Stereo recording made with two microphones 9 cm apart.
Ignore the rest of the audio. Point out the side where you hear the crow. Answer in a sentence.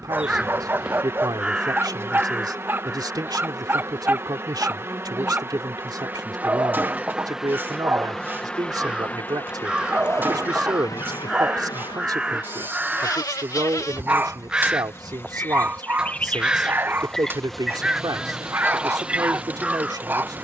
In this clip you hear the crow in the centre.